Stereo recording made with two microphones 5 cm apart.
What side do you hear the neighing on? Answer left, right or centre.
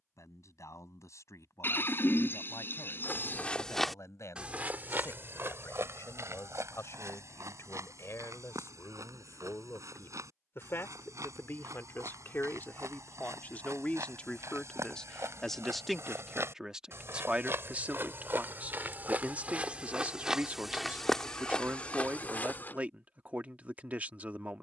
left.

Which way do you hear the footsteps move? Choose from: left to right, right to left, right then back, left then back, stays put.
right then back.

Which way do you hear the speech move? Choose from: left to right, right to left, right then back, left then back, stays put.
left to right.